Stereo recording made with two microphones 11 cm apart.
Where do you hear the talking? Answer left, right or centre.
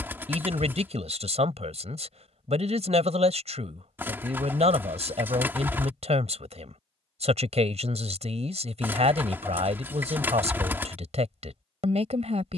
right.